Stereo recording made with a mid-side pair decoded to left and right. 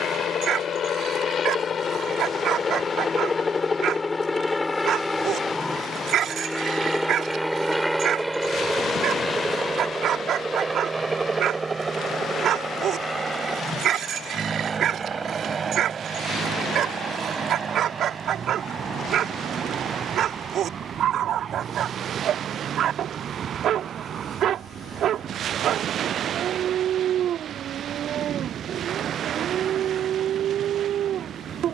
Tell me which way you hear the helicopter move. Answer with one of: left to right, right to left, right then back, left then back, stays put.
left to right.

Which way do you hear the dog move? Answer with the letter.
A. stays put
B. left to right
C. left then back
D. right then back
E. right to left
A.